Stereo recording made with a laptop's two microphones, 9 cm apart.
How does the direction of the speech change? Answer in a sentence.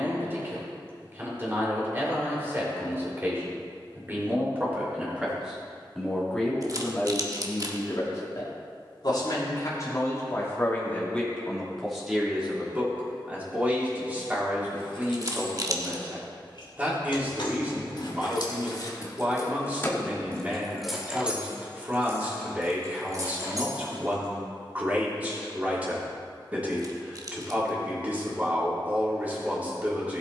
In this clip you hear the speech move from right to left and back again.